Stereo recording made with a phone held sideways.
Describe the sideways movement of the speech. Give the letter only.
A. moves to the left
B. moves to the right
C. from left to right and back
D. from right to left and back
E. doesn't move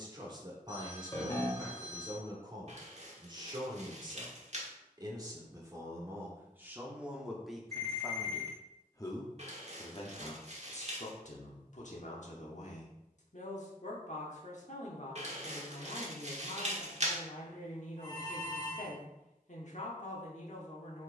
A.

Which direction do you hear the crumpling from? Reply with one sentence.
In this clip you hear the crumpling on the right.